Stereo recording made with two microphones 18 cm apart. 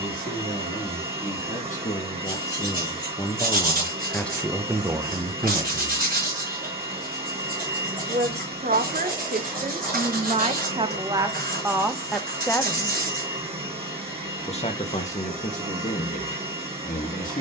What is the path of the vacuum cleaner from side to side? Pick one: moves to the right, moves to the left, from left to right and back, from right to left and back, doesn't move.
doesn't move.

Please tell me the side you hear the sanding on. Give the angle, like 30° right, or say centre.
60° right.